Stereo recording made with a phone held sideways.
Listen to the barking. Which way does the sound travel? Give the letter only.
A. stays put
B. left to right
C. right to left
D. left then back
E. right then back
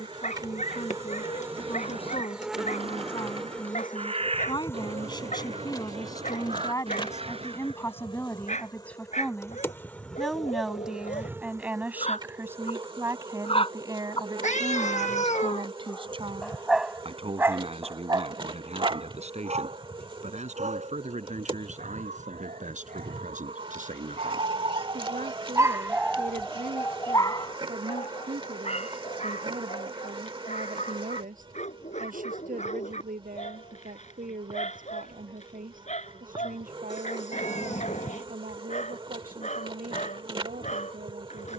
E.